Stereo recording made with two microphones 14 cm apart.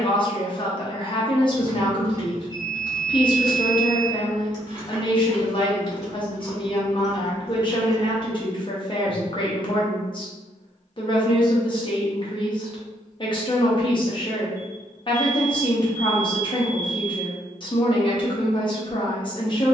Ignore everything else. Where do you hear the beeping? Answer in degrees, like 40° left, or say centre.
20° right.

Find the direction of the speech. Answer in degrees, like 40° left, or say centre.
40° left.